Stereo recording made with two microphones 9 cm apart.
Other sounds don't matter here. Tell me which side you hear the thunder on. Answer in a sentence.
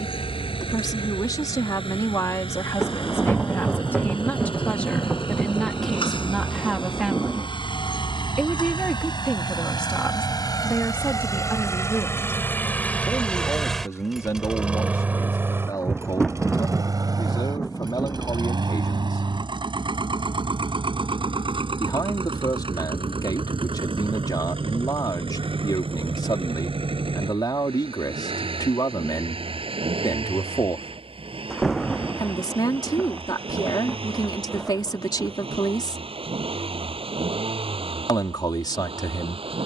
You can hear the thunder in the centre.